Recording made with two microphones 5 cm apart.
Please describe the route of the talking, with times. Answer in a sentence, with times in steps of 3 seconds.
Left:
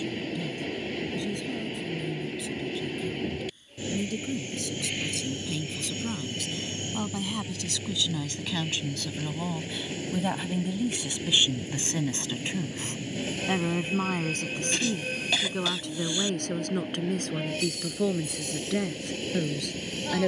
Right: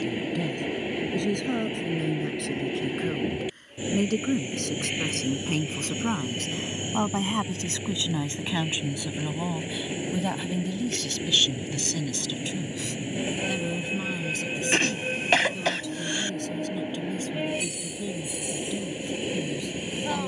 You can hear the talking on the right from 0 s, in the centre from 9 s and on the left from 12 s.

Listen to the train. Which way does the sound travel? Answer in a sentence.
In this clip you hear the train stay in one place.